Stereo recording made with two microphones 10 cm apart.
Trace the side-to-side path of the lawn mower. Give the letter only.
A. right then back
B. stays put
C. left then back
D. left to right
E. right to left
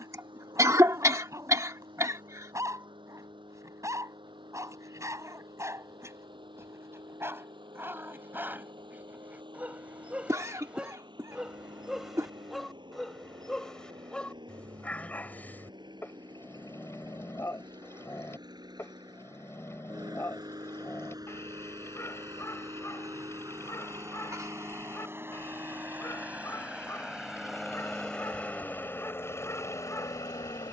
E.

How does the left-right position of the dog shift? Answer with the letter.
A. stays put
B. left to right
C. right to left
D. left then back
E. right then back
C.